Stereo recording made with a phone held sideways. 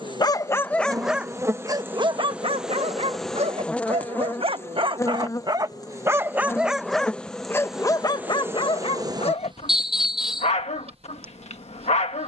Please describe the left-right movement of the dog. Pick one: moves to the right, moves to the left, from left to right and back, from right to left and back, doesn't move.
from left to right and back.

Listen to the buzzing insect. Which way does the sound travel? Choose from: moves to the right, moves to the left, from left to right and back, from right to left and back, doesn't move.
from right to left and back.